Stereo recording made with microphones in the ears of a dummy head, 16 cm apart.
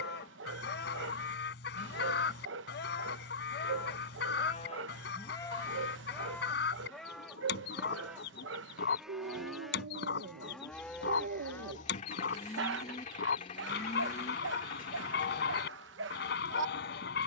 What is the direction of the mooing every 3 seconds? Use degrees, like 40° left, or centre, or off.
60° left, 40° left, centre, centre, 30° left, 60° left.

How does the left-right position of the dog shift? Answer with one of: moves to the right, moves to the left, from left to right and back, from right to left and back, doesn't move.
doesn't move.